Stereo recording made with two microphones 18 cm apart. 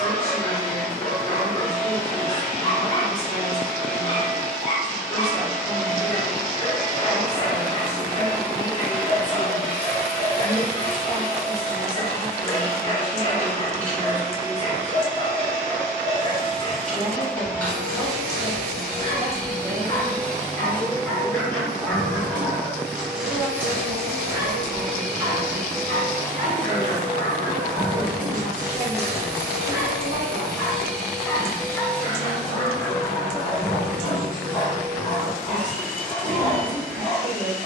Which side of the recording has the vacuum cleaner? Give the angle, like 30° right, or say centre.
10° left.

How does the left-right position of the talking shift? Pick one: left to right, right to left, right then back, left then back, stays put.
left to right.